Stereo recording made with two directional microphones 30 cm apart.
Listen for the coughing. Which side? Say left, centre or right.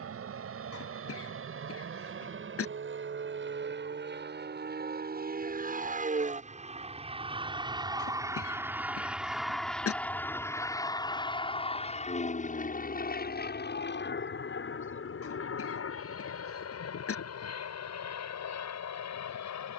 left.